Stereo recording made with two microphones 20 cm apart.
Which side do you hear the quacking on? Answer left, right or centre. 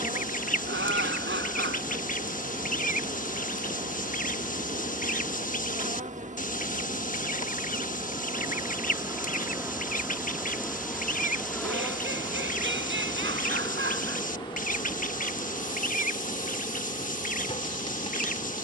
left.